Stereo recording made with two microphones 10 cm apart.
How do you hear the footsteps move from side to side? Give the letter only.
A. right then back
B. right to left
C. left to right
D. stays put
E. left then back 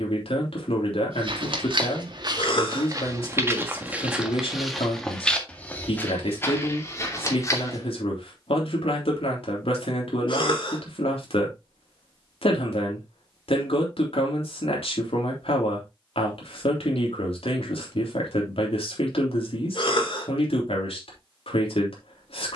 B.